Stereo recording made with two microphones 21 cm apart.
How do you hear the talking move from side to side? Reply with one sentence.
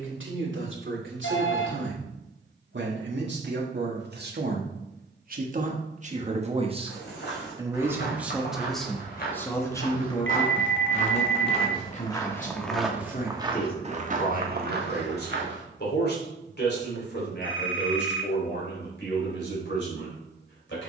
In this clip you hear the talking travel towards the left.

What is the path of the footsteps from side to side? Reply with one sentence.
In this clip you hear the footsteps go from the left side to the right.